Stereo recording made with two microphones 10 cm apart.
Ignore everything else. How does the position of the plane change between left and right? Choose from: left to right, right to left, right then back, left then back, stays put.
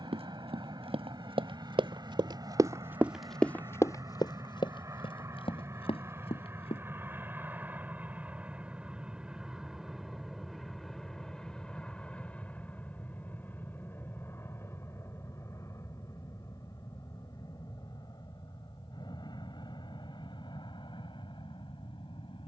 right to left.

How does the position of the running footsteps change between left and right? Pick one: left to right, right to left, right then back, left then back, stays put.
right to left.